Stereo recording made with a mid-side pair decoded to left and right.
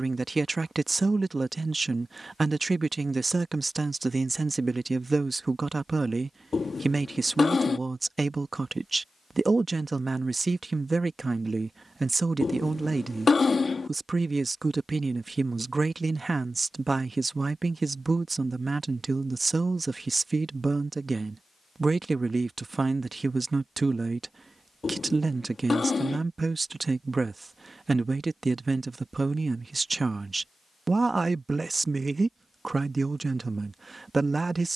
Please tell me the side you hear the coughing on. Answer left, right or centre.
left.